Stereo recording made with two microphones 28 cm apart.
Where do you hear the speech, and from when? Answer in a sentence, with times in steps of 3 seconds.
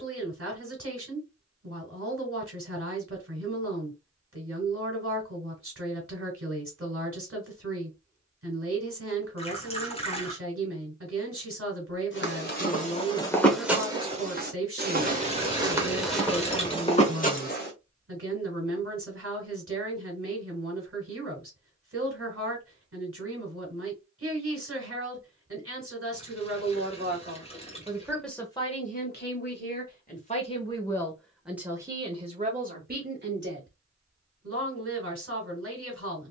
You can hear the speech on the right from 0 s, in the centre from 27 s and on the right from 33 s.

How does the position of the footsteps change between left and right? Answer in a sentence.
In this clip you hear the footsteps go right and come back.